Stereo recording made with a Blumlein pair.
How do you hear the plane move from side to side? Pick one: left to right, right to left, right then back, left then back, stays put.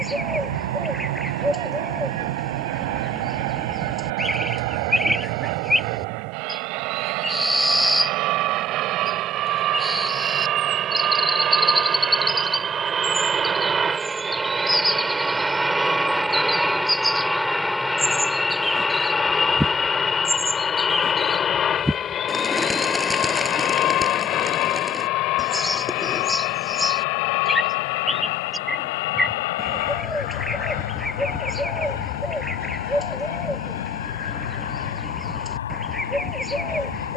right to left.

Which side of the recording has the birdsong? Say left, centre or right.
centre.